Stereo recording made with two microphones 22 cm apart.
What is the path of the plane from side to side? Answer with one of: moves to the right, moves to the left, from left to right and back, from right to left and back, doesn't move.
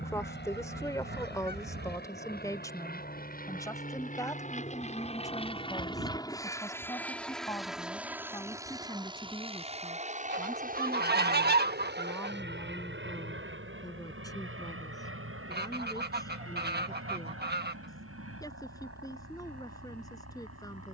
moves to the right.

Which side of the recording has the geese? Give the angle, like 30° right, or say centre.
50° right.